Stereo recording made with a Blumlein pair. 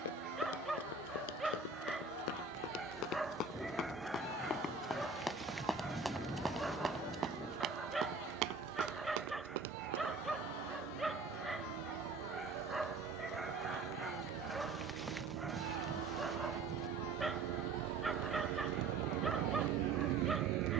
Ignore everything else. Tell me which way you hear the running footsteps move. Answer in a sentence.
In this clip you hear the running footsteps go from the left side to the right.